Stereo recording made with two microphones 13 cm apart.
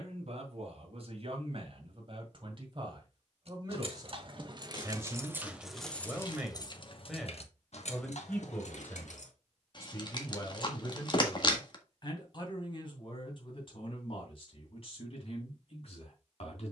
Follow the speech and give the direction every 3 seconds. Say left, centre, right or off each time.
right, right, centre, left, left, left.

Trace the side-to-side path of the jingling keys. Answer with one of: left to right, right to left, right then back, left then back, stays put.
right to left.